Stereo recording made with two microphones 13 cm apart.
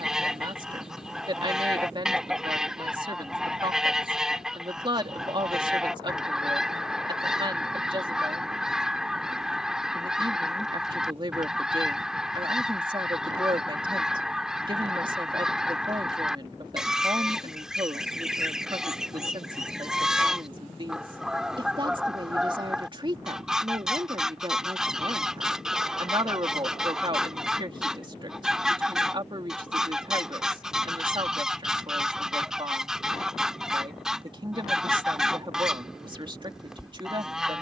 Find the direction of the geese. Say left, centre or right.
centre.